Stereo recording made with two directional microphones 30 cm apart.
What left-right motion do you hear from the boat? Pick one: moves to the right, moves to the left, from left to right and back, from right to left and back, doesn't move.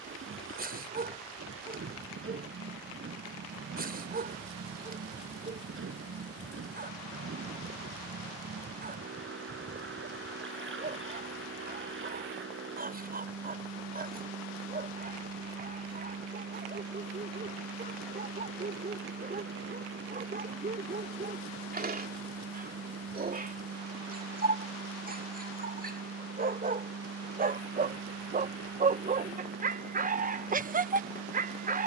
doesn't move.